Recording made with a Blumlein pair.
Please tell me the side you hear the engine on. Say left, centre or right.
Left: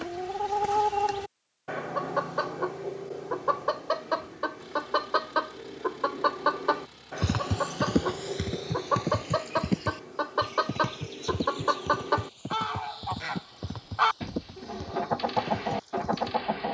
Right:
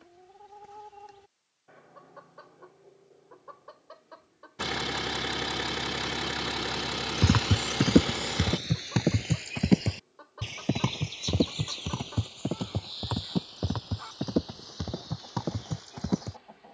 right.